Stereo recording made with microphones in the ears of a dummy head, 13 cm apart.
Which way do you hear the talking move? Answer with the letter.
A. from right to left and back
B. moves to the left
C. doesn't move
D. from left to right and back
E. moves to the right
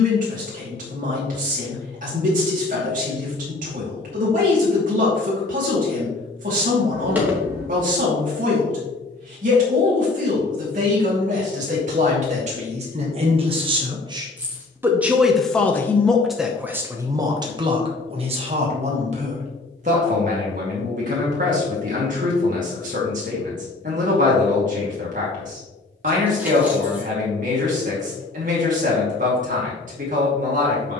A.